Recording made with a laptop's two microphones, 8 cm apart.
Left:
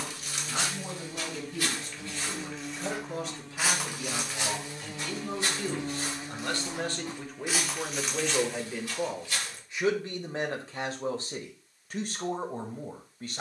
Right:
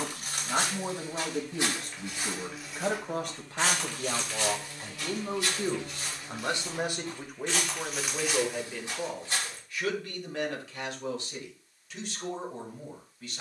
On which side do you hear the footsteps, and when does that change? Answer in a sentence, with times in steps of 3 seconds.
In this clip you hear the footsteps on the right from 0 s, on the left from 3 s, in the centre from 6 s, on the right from 9 s and not at all from 12 s.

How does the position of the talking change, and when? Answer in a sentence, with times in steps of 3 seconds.
In this clip you hear the talking on the right from 0 s, in the centre from 6 s and on the left from 9 s.